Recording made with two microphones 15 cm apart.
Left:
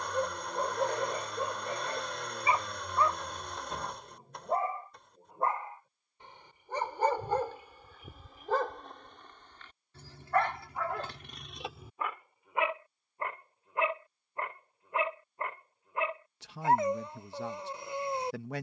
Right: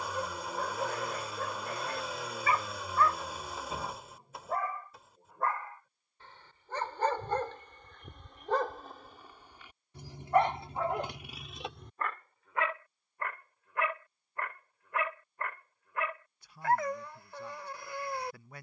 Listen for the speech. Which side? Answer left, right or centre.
left.